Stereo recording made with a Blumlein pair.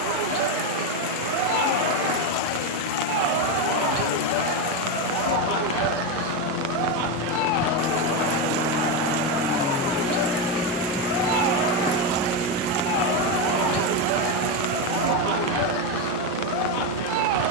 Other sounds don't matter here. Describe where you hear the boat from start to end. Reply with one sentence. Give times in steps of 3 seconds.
You can hear the boat on the left from 0 s, in the centre from 9 s and on the right from 12 s.